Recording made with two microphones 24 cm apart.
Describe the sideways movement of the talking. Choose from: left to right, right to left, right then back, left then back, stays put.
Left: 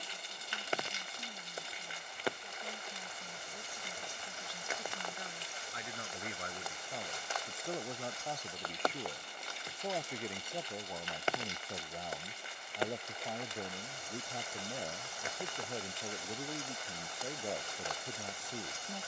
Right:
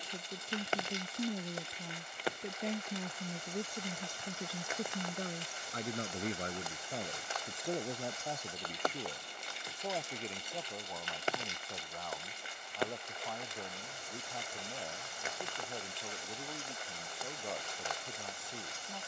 right to left.